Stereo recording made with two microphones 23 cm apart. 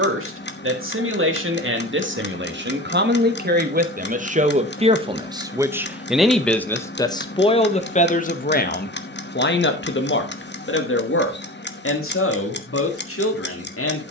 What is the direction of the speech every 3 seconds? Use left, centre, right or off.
right, right, left, left, left.